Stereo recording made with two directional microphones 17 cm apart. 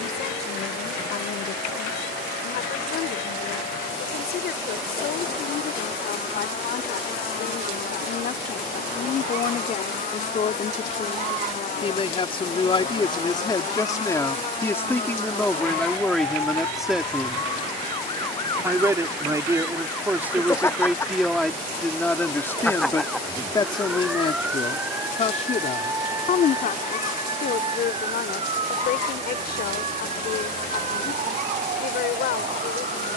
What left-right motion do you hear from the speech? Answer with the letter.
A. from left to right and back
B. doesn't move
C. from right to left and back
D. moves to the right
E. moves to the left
A.